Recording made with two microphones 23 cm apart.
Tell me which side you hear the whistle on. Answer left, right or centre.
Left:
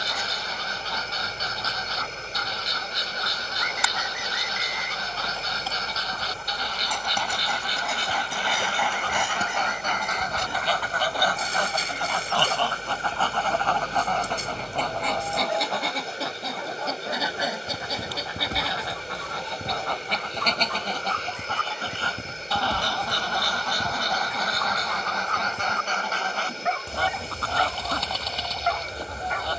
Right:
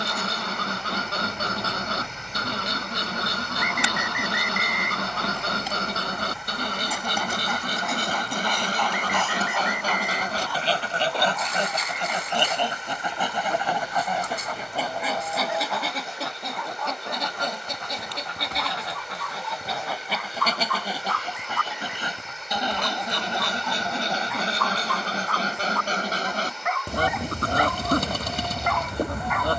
right.